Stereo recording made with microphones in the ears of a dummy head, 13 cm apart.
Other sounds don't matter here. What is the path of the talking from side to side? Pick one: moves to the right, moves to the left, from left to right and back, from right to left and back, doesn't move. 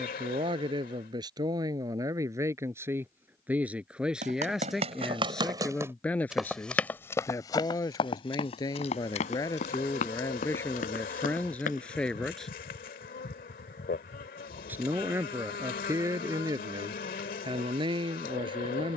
from right to left and back.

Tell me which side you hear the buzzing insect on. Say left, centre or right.
left.